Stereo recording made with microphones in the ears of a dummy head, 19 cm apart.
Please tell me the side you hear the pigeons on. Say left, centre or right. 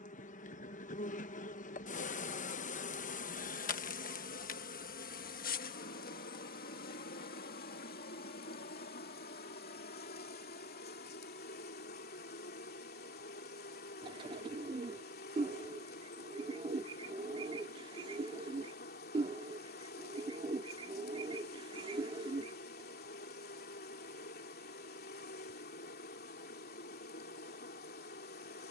right.